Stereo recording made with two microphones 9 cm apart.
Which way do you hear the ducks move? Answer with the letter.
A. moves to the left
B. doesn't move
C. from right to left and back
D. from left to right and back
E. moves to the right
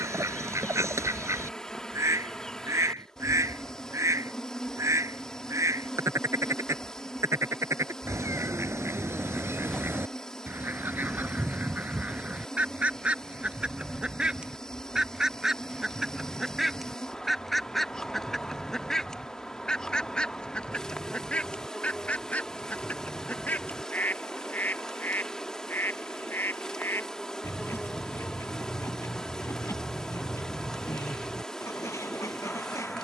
A.